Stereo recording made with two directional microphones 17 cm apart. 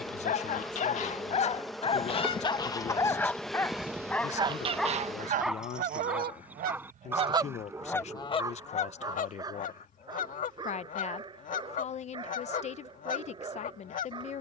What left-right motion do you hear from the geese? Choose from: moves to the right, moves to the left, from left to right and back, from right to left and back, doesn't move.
from left to right and back.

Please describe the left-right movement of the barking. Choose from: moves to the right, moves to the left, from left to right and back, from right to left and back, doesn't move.
moves to the right.